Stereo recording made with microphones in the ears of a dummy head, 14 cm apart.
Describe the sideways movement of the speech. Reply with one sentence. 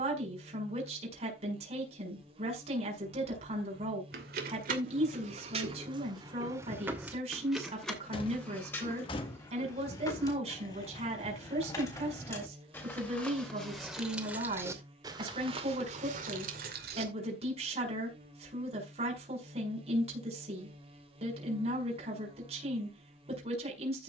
In this clip you hear the speech stay in one place.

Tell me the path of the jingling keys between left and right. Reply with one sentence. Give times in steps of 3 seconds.
You can hear the jingling keys not at all from 0 s, on the right from 3 s, in the centre from 6 s, on the left from 9 s, in the centre from 12 s, on the right from 15 s and not at all from 18 s.